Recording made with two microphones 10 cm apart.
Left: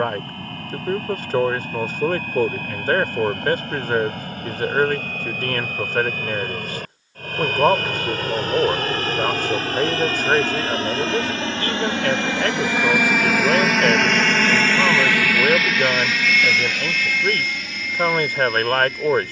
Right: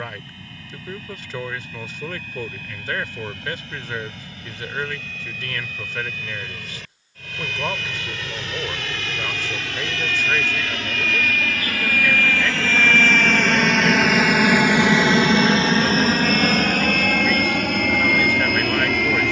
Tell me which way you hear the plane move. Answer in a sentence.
In this clip you hear the plane move to the right.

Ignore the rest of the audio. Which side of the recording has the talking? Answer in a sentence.
In this clip you hear the talking on the left.